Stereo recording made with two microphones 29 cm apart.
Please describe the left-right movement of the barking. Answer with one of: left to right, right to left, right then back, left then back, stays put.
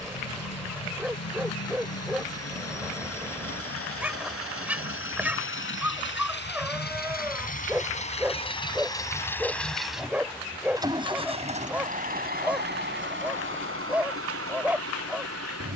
stays put.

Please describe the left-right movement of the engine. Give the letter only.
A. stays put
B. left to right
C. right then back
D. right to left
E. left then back
B.